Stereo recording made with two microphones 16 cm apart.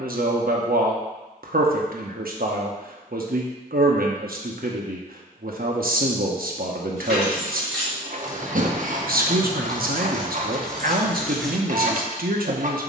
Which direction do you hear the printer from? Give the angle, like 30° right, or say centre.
50° right.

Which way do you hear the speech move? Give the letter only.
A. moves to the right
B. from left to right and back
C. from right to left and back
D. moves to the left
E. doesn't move
E.